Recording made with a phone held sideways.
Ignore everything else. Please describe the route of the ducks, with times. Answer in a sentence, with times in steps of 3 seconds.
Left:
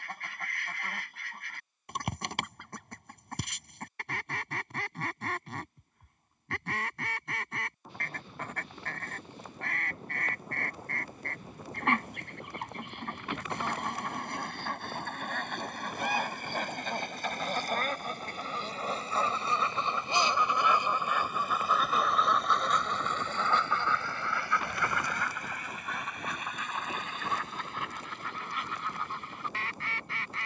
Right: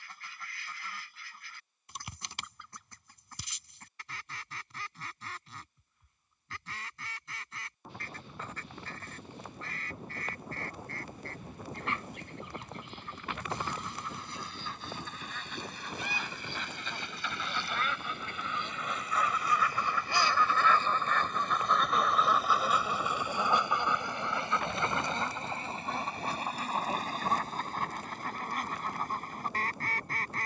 You can hear the ducks on the left from 0 s, in the centre from 21 s and on the right from 24 s.